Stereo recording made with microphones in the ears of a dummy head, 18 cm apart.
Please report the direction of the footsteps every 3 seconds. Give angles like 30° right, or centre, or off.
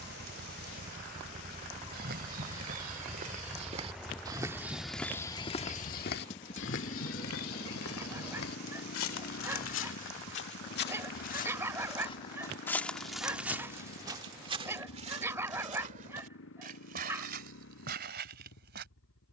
50° right, 10° right, 70° left, 50° left, 10° right, 40° right, 50° right.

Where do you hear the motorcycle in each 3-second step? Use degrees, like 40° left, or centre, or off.
40° right, 10° left, 40° left, 50° left, 60° left, 60° left, 70° left.